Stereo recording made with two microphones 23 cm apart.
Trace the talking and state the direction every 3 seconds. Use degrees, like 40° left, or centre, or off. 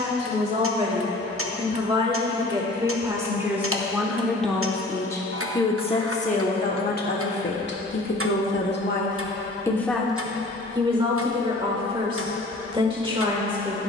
20° right, centre, 50° left, centre, 20° right.